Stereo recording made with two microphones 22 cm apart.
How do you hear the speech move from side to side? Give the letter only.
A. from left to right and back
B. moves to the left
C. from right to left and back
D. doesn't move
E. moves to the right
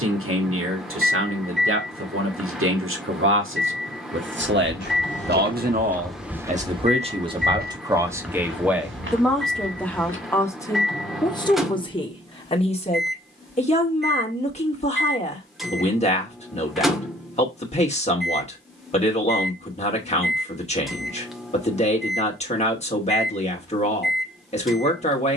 B.